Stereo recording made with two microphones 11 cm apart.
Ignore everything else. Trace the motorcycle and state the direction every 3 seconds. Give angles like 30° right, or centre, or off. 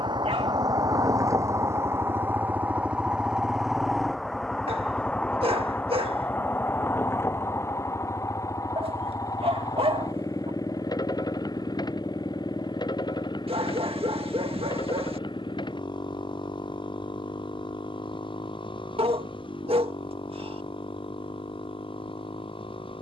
30° right, centre, 20° left, 30° left, 40° left, 40° left, 50° left, 50° left.